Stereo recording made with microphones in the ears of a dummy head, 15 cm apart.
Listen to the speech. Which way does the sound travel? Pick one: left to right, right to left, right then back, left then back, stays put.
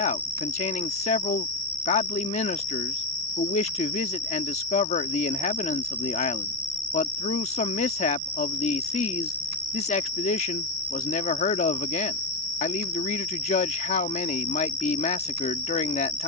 stays put.